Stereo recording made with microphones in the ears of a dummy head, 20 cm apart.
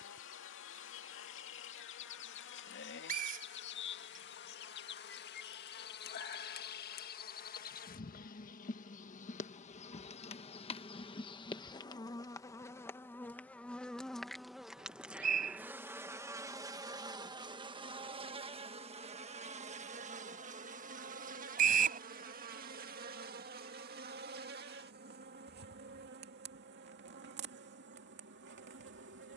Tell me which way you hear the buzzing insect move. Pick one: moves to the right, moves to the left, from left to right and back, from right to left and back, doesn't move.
moves to the right.